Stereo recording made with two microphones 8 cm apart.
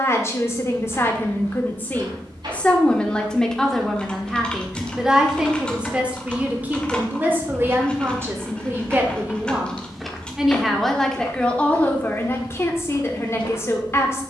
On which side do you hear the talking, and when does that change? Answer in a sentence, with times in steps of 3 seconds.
You can hear the talking on the left from 0 s, in the centre from 3 s, on the right from 6 s, in the centre from 9 s and on the left from 12 s.